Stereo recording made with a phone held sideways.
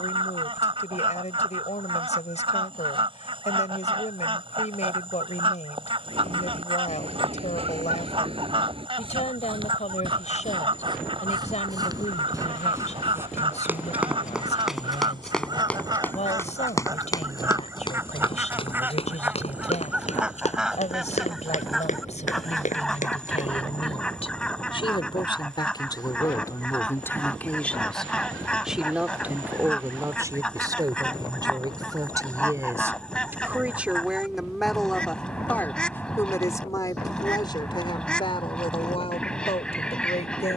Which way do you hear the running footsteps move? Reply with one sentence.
In this clip you hear the running footsteps move from right to left.